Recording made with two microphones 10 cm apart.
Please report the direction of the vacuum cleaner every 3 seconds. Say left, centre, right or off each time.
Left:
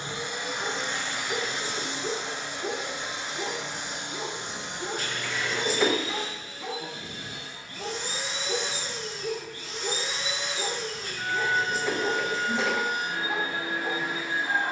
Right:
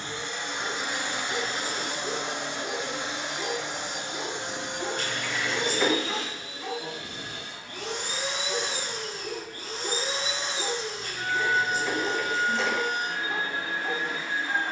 right, right, right, right, centre.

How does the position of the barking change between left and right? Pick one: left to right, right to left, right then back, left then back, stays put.
right then back.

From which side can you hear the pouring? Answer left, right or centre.
centre.